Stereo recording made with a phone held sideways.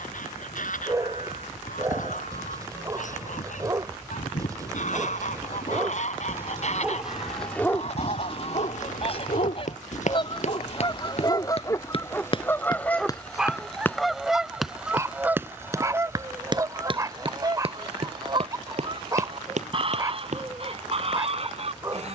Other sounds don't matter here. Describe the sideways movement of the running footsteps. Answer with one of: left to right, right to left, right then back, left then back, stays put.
left to right.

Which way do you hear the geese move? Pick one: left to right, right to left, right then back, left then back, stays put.
left to right.